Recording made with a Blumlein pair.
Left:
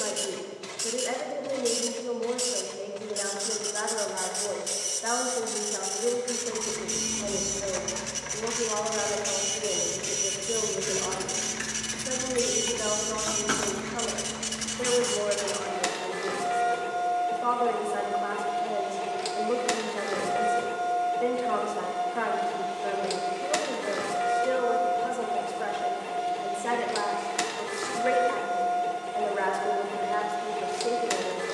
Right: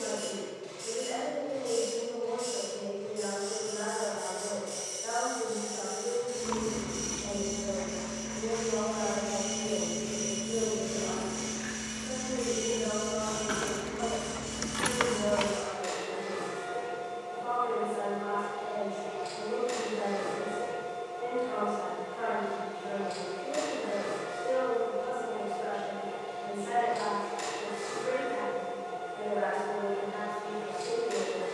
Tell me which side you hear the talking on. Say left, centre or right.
left.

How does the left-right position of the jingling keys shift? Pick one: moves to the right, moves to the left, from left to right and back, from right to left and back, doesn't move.
from right to left and back.